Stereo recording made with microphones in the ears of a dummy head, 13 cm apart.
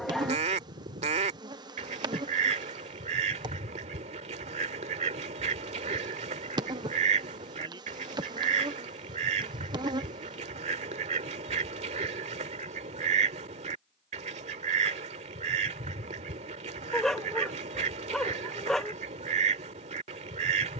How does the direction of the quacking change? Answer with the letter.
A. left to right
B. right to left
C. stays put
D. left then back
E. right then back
C.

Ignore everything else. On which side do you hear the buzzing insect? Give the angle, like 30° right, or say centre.
30° right.